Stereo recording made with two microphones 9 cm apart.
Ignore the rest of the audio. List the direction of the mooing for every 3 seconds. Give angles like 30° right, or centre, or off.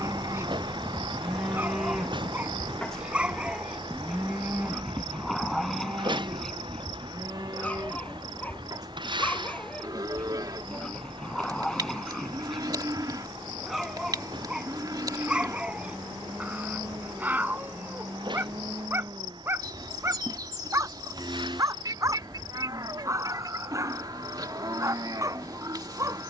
10° right, 20° right, 40° right, 50° right, 50° right, 50° right, 50° right, 50° right, 50° right.